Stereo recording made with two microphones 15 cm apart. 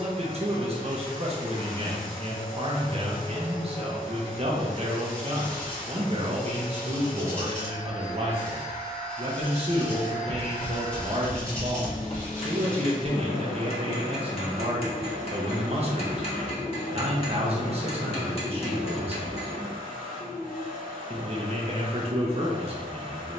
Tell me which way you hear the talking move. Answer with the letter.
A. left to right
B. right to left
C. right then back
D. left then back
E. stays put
E.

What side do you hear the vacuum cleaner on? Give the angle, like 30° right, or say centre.
60° left.